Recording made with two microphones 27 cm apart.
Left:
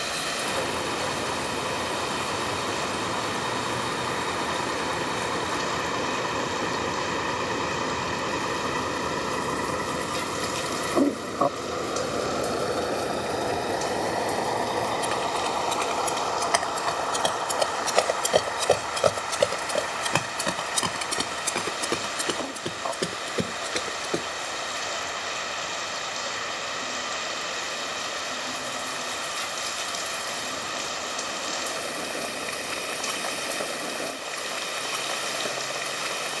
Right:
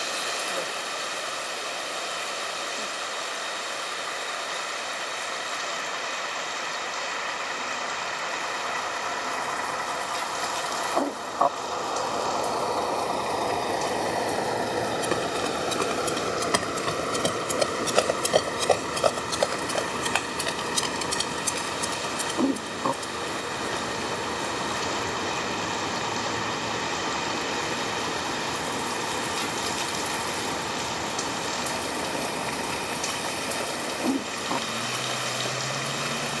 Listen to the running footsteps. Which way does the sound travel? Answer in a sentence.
You can hear the running footsteps move to the left.